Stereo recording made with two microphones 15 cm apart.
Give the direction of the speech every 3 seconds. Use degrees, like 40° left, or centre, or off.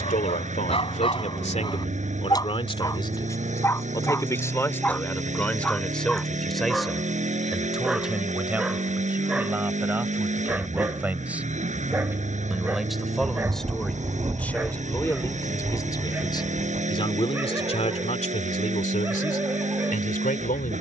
50° left, 20° left, centre, 10° right, centre, 30° left, 60° left.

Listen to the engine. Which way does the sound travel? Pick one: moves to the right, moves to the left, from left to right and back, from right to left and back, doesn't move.
doesn't move.